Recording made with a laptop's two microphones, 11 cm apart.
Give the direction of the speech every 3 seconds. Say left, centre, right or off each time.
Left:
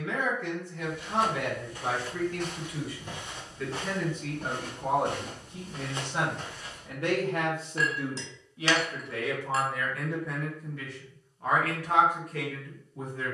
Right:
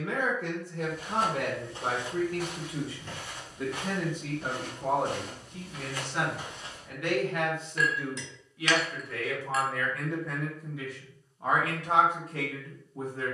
right, centre, left, centre, right.